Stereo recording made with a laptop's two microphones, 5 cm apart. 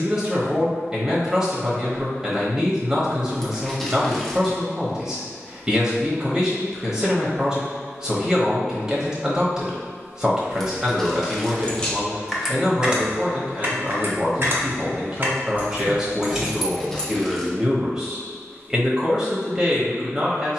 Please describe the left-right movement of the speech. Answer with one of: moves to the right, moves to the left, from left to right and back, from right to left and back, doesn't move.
doesn't move.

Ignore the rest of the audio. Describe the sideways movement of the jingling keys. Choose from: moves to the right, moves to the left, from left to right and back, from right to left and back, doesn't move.
from left to right and back.